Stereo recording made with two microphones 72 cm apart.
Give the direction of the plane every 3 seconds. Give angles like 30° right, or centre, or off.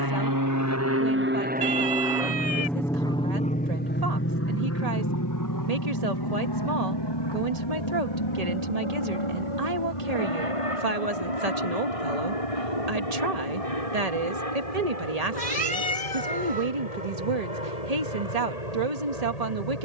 10° right, 20° left, 30° left, 40° left, 50° left, 50° left, 50° left.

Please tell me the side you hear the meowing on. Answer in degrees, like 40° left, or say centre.
30° right.